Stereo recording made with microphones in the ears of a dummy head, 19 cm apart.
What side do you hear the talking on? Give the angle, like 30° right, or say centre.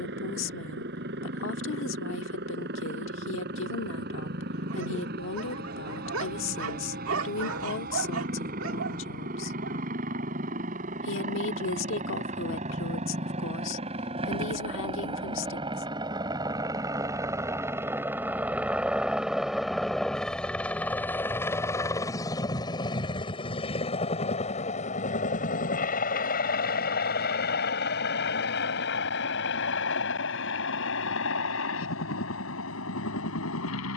60° left.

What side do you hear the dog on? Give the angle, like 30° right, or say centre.
80° right.